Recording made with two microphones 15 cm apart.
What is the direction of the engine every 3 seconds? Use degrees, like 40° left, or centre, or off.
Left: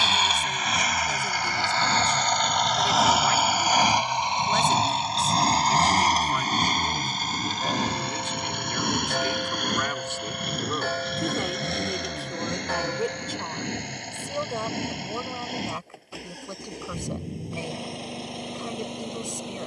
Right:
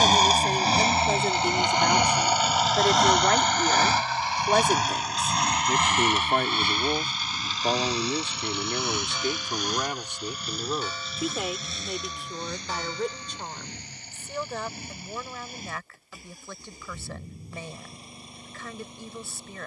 20° right, 20° left, 40° left, 60° left, 60° left, 70° left, 70° left.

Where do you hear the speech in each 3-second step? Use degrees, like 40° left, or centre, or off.
50° right, 50° right, 40° right, 10° right, 10° left, 20° left, 20° left.